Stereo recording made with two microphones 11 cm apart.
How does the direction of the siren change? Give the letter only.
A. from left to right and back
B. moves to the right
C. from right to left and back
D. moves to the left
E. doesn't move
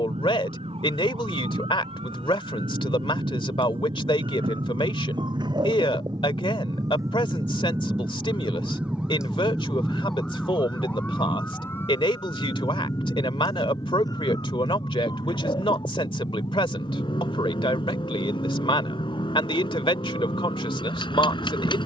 D.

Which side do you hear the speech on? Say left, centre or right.
left.